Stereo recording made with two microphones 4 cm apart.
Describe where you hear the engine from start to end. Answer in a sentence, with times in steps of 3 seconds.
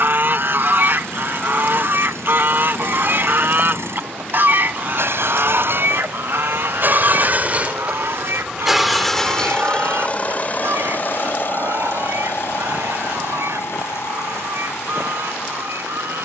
In this clip you hear the engine on the right from 0 s and on the left from 9 s.